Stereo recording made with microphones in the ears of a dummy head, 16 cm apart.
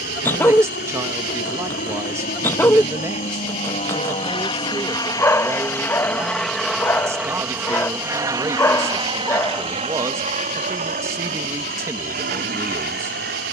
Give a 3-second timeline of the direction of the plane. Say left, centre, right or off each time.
left, left, centre, right, right.